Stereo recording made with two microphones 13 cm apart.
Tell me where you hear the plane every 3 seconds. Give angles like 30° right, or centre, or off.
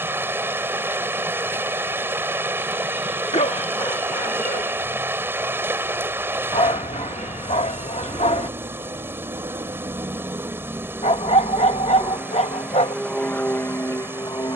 60° right, 60° right, 50° right, 20° right, 10° left.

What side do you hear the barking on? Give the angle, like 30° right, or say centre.
60° left.